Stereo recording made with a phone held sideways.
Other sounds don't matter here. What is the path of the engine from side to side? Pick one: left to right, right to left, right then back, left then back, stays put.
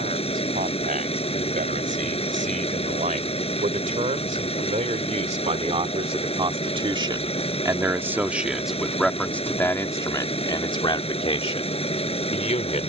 stays put.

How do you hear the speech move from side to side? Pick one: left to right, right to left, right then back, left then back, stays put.
right to left.